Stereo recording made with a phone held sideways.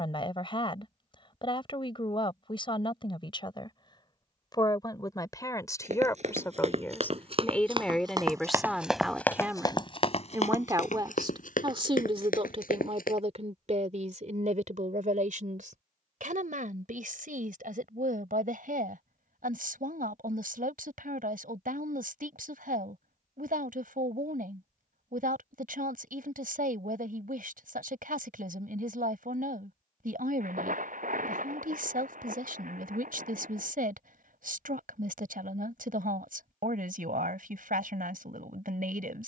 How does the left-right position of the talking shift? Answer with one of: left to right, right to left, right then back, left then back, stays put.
left to right.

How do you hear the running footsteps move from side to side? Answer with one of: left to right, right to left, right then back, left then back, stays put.
right to left.